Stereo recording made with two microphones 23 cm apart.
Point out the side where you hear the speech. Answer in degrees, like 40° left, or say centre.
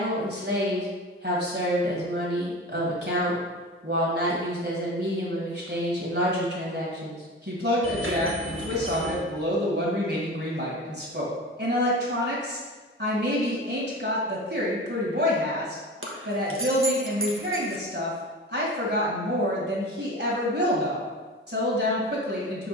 50° right.